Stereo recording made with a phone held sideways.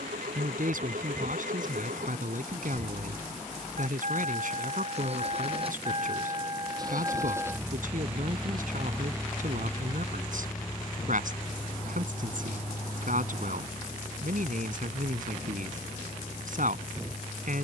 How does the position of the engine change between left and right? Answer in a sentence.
In this clip you hear the engine move to the left.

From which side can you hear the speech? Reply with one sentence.
In this clip you hear the speech on the right.